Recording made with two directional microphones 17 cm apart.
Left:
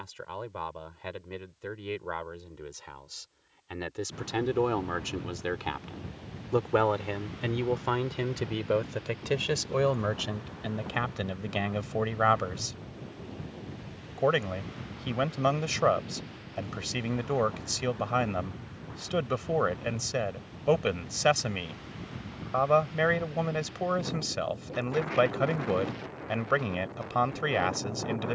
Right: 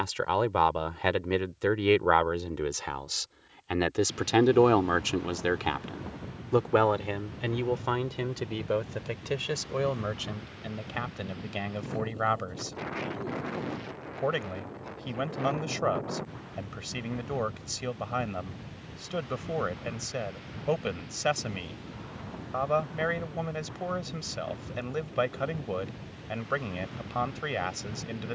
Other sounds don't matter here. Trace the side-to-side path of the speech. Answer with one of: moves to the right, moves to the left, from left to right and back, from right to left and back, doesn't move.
moves to the left.